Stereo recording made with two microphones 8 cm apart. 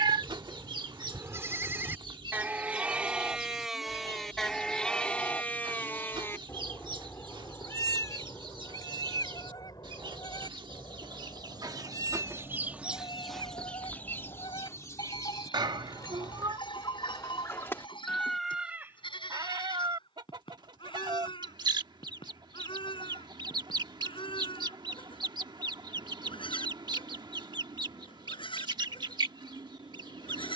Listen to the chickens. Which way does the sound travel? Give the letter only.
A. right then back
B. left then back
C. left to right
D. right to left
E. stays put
B.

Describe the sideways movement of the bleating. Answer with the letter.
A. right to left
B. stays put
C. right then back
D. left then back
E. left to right
A.